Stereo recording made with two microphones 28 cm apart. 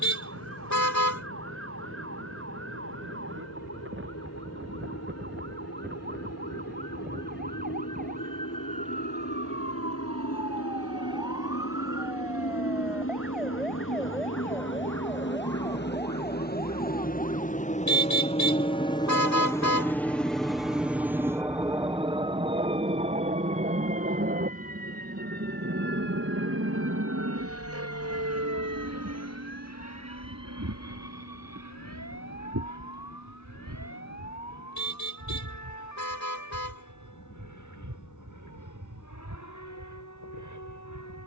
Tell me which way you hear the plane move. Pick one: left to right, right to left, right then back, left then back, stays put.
left to right.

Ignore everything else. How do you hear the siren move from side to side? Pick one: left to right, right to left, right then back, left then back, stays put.
right to left.